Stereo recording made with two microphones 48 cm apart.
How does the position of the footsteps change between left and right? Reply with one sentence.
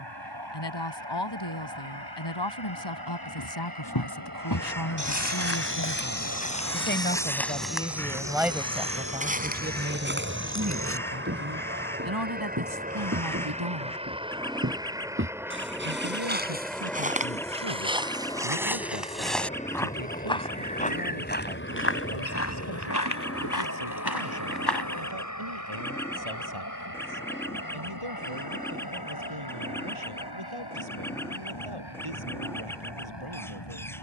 You can hear the footsteps move from left to right and back again.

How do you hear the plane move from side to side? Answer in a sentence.
You can hear the plane move to the left.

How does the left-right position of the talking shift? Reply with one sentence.
You can hear the talking go from the left side to the right.